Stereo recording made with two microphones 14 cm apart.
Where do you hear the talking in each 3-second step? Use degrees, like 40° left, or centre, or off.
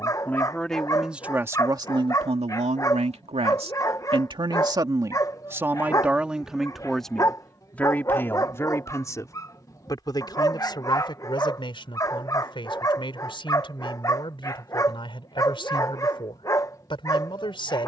20° right, 30° right, 10° left, 30° left, 40° left, 40° left.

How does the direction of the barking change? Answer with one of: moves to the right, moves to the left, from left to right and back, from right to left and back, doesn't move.
doesn't move.